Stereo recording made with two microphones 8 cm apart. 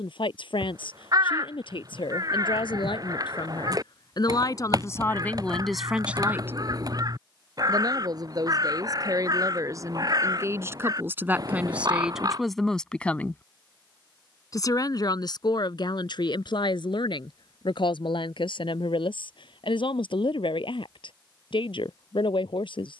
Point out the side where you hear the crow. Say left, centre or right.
right.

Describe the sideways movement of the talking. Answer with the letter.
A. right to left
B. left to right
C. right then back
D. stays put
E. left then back
C.